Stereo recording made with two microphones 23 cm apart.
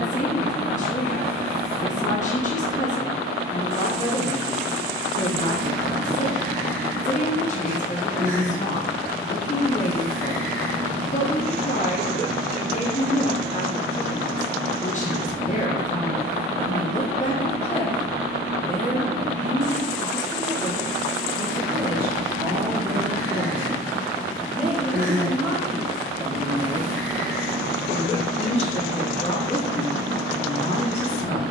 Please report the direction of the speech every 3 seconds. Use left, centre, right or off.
left, left, left, left, left, left, centre, centre, centre, left, left.